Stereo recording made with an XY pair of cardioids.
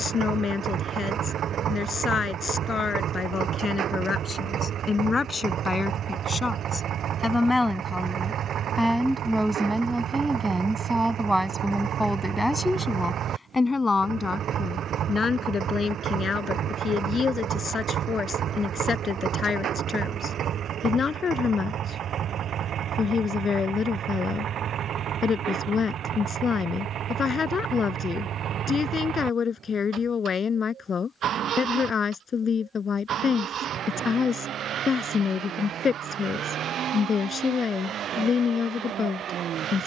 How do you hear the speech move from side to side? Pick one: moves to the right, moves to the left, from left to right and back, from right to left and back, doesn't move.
from left to right and back.